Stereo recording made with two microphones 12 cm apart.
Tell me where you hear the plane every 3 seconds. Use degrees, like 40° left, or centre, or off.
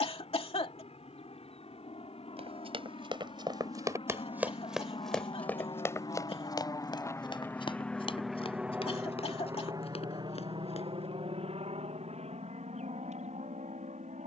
70° left, 60° left, 20° left, 40° right, 60° right.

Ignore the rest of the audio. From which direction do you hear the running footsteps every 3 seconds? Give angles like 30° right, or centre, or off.
50° right, 10° right, 40° left, 60° left, off.